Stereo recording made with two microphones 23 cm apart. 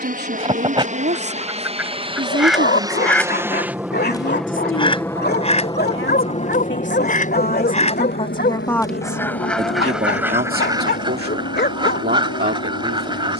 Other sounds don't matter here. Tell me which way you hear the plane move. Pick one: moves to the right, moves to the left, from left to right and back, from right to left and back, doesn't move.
moves to the left.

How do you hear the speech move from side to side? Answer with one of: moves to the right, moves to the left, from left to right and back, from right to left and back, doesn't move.
from right to left and back.